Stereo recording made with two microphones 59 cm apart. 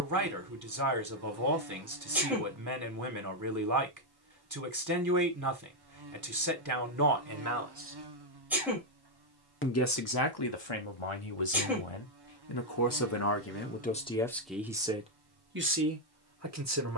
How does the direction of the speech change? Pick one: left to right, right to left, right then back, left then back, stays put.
left then back.